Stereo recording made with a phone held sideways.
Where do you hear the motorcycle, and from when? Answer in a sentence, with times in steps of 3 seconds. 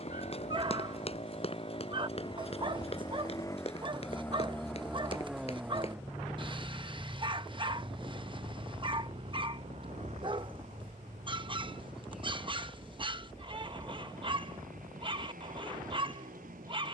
You can hear the motorcycle on the left from 0 s, in the centre from 3 s and on the right from 6 s.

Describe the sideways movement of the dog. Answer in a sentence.
In this clip you hear the dog stay in one place.